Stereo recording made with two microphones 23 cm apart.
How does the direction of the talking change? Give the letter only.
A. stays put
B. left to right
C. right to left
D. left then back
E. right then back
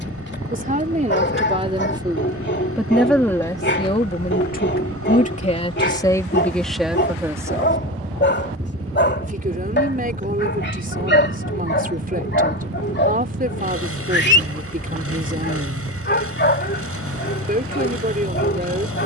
D.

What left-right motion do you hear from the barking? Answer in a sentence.
You can hear the barking stay put.